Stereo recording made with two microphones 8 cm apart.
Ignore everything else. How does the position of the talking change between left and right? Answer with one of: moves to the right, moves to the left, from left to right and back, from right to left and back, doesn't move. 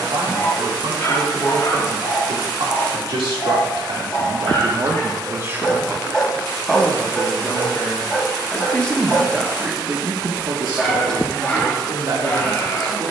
from right to left and back.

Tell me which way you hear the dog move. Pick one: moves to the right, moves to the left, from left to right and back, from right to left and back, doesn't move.
from left to right and back.